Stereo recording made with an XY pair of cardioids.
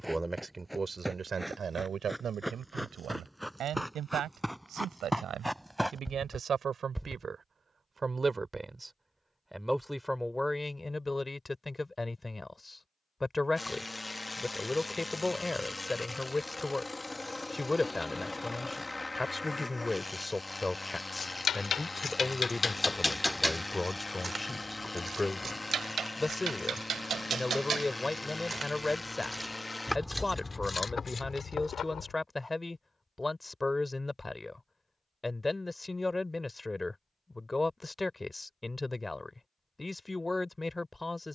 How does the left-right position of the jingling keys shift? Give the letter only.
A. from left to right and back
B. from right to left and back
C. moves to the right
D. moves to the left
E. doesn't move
A.